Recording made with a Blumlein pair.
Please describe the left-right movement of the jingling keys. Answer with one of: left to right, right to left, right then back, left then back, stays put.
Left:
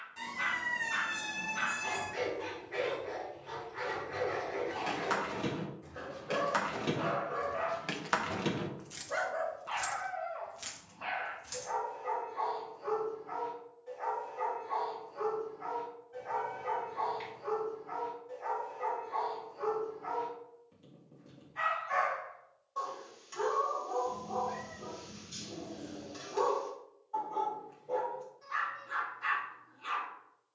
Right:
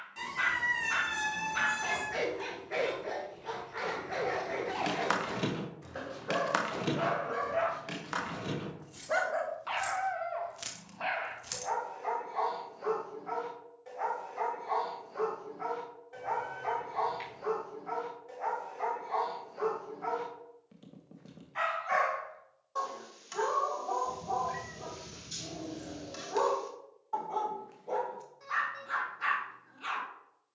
left then back.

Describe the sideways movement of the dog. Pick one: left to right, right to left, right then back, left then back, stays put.
stays put.